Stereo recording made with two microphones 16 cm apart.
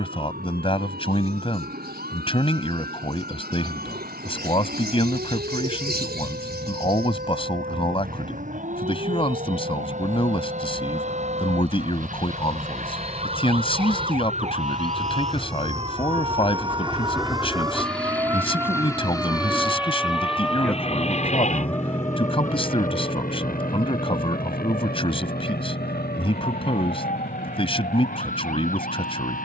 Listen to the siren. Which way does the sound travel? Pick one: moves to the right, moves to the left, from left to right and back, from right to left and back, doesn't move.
moves to the left.